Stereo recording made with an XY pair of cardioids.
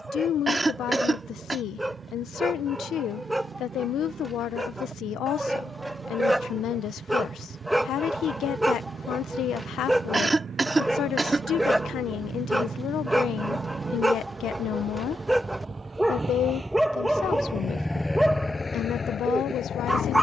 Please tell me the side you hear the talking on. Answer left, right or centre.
left.